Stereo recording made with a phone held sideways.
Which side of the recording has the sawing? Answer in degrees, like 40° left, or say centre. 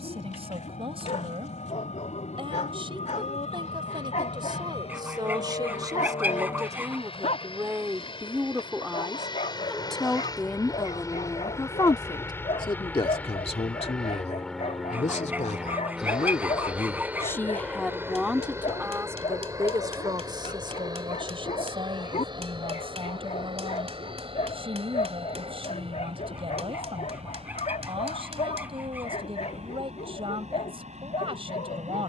10° right.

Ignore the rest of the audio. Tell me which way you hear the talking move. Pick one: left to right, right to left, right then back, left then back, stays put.
left then back.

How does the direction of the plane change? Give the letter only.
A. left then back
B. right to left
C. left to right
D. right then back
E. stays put
C.